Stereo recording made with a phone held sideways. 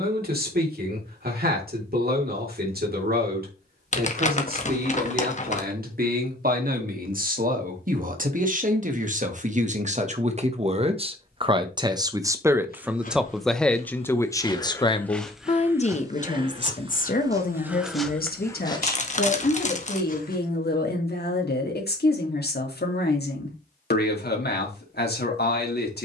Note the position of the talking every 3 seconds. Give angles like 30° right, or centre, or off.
70° right, 70° right, 60° right, 40° right, centre, 50° left, 70° left, 80° left, 80° left.